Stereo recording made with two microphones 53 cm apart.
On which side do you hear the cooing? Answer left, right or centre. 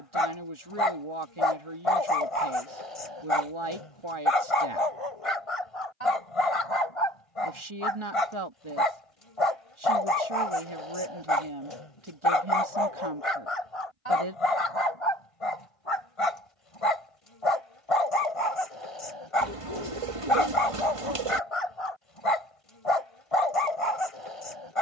right.